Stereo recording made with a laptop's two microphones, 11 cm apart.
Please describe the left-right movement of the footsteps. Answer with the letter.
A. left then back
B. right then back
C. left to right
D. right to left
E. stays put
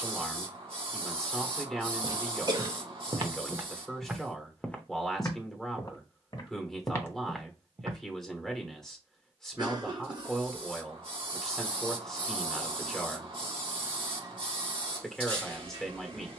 A.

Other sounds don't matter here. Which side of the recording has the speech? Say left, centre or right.
centre.